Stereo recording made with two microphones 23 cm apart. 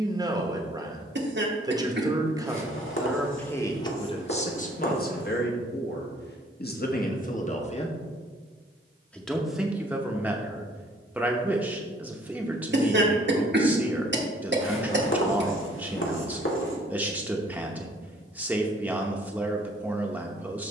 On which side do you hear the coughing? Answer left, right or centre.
right.